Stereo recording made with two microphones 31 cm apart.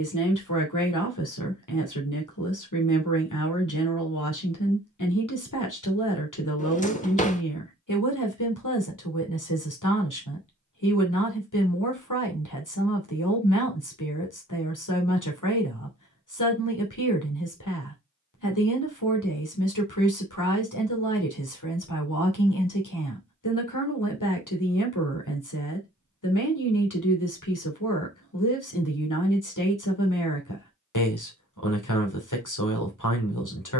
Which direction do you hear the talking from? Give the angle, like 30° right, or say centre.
80° left.